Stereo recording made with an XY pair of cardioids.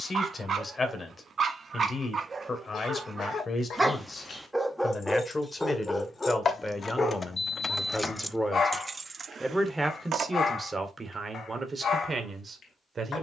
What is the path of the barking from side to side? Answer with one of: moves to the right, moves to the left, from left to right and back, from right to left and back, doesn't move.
moves to the left.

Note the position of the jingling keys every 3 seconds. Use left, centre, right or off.
off, left, left, right, off.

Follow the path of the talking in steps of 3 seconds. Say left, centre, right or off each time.
left, left, centre, right, right.